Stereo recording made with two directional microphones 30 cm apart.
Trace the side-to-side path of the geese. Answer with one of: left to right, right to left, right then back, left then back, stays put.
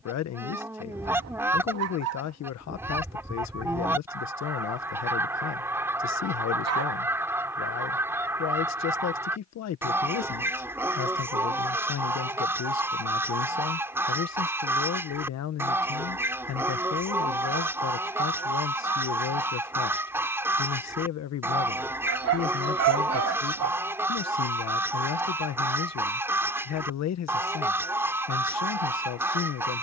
stays put.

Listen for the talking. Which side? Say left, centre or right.
left.